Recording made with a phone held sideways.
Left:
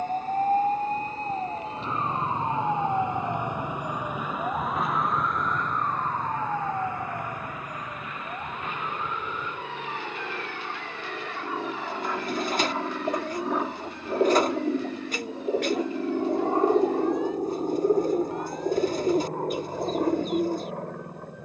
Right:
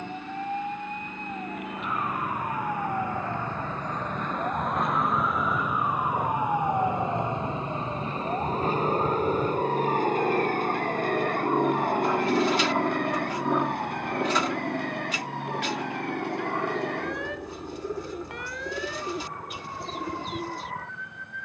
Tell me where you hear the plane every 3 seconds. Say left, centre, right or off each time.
right, right, right, right, centre, left, left.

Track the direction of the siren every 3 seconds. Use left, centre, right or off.
left, centre, right, right, right, right, right.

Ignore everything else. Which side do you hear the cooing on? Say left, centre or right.
left.